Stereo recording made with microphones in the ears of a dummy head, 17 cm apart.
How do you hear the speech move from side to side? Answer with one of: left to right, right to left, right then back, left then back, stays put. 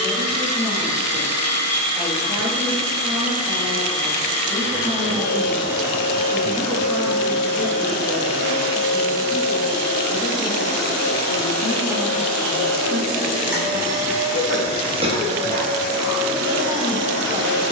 left then back.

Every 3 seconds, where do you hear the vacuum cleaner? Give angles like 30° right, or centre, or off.
30° left, 30° left, 30° left, 20° left, 10° right, 50° right.